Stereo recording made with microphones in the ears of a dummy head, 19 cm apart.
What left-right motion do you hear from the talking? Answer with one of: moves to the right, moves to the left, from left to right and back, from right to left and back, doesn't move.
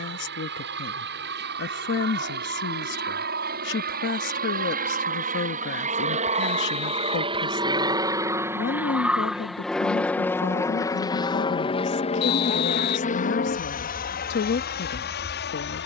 doesn't move.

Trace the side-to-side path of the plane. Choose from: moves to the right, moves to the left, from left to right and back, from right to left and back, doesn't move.
moves to the left.